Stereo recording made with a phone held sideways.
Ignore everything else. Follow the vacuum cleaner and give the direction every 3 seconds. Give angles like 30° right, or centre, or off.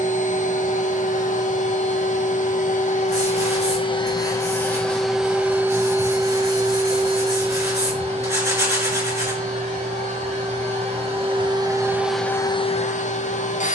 60° left, 20° left, 30° right, 40° right, 40° left.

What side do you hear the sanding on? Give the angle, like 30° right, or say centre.
20° right.